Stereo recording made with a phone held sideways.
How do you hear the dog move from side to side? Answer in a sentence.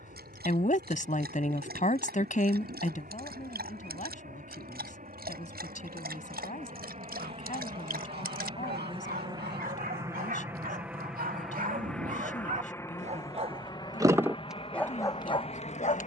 You can hear the dog move to the left.